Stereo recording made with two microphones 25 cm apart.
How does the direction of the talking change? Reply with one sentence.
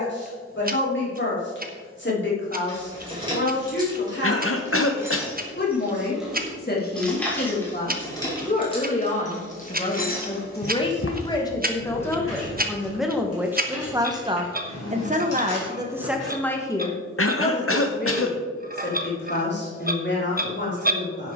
You can hear the talking move from left to right and back again.